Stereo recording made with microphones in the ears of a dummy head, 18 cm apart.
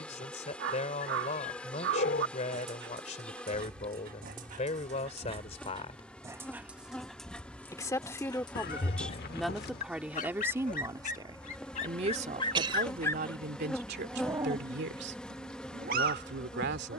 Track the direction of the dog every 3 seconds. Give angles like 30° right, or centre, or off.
60° right, 40° right, 10° left, 40° left, centre, 50° right.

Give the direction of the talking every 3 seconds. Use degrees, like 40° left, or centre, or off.
40° left, 30° left, 10° left, 10° right, 50° right, 60° right.